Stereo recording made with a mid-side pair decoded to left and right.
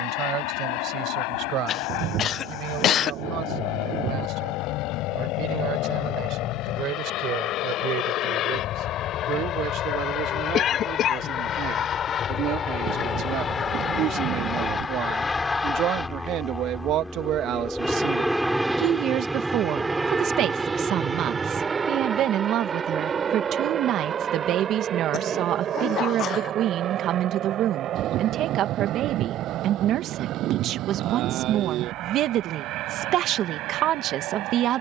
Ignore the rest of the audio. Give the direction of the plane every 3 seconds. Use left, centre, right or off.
left, left, left, left, left, centre, centre, right, right, right, right, right.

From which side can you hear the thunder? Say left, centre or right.
right.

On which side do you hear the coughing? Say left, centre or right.
left.